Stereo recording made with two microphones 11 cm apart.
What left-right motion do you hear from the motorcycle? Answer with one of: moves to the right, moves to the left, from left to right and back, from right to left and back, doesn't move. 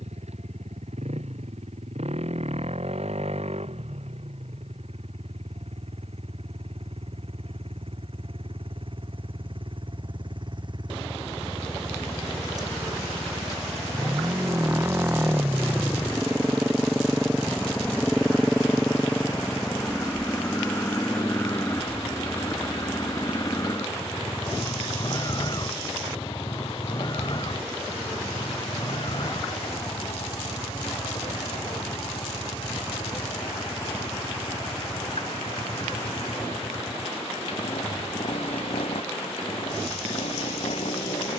moves to the left.